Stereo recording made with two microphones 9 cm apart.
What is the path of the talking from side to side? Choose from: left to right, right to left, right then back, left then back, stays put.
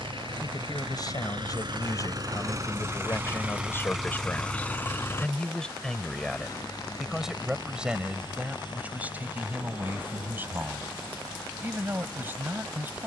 left to right.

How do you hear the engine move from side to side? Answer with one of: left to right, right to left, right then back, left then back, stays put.
right to left.